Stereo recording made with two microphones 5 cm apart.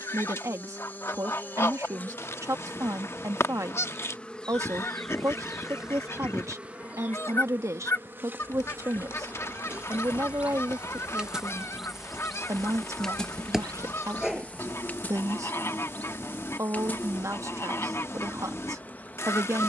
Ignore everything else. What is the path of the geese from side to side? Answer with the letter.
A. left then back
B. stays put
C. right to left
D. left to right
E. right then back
B.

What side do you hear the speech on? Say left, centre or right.
right.